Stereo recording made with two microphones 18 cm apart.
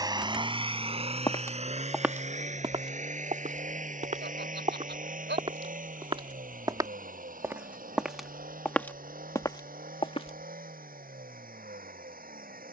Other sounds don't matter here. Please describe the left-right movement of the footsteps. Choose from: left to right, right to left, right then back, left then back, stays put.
right then back.